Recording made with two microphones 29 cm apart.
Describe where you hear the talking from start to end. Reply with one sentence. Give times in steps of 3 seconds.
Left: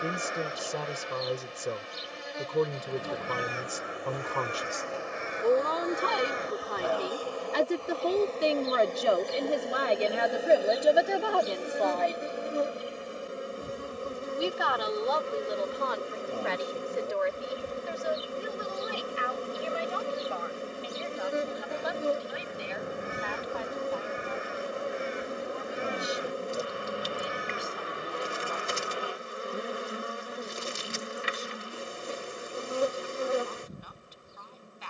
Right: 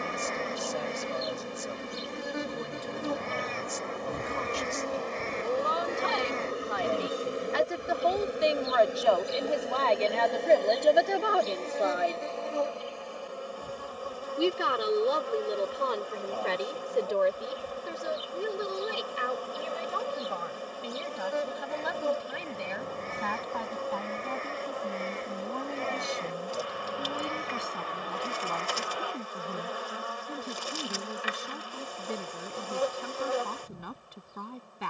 In this clip you hear the talking on the left from 0 s, in the centre from 9 s and on the right from 12 s.